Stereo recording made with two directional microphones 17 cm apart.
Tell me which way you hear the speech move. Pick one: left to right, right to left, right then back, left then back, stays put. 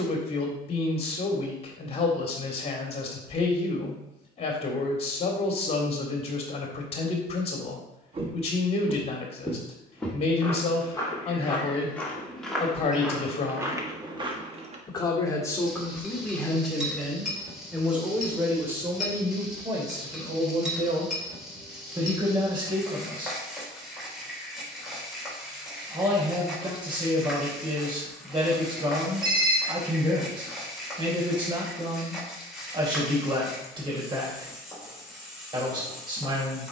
left to right.